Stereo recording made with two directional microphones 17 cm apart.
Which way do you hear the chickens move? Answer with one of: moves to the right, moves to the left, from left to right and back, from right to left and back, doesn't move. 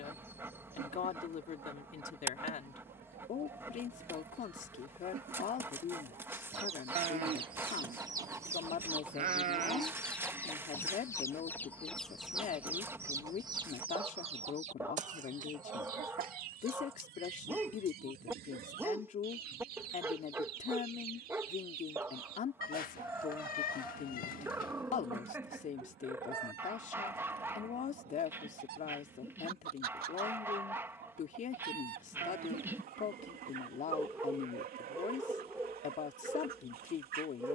from right to left and back.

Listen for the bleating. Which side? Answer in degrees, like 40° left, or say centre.
50° right.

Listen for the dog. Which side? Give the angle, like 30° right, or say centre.
10° right.